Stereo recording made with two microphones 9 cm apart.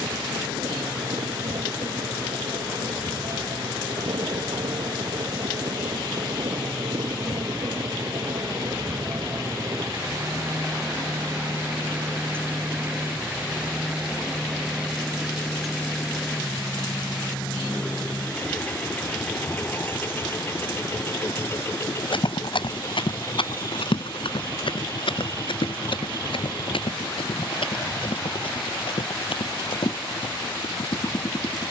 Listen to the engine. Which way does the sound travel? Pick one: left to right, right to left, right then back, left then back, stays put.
right to left.